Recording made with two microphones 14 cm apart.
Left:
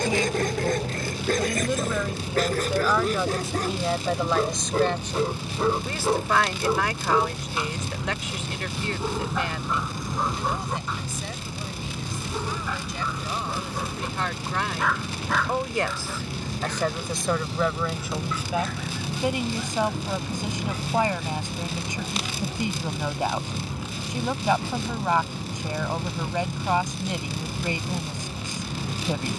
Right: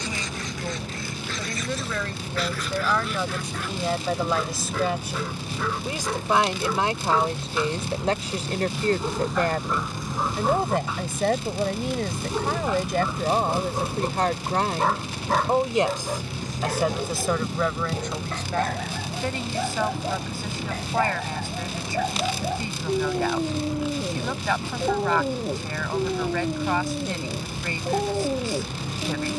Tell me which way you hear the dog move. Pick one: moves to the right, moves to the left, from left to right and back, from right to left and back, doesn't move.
moves to the right.